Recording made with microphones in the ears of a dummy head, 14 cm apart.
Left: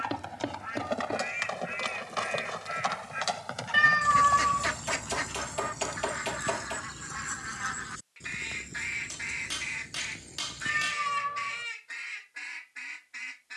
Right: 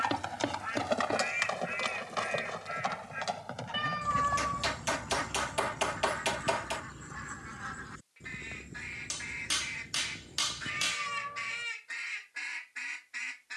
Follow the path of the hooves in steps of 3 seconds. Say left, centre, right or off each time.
centre, left, left, left, off.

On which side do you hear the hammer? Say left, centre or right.
right.